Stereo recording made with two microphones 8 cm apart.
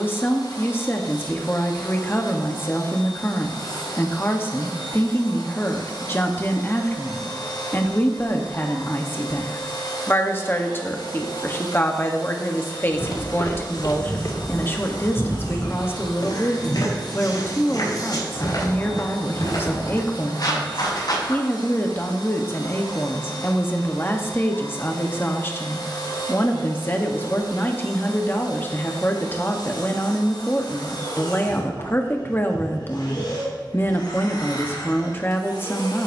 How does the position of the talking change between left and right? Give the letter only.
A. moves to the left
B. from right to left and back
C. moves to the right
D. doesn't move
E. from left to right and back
D.